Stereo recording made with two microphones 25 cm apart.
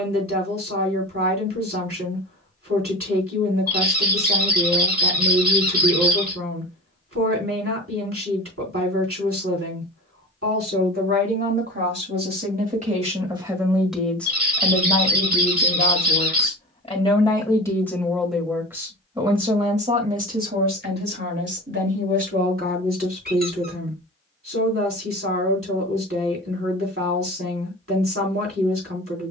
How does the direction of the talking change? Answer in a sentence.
You can hear the talking go left and come back.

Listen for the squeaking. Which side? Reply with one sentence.
You can hear the squeaking on the right.